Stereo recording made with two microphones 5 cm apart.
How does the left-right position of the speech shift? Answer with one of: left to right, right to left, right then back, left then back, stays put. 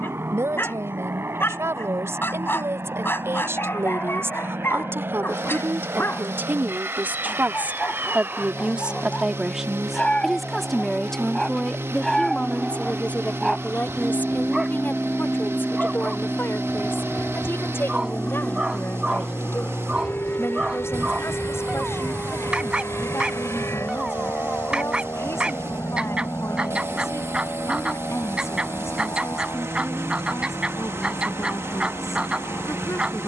right to left.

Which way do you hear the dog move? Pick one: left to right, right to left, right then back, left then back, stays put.
left to right.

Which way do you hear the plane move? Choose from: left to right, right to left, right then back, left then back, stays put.
right to left.